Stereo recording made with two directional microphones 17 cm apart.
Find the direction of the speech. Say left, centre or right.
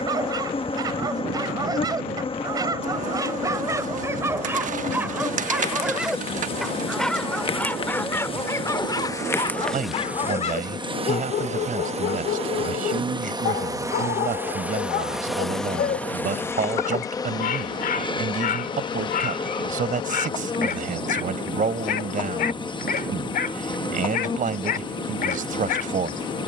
right.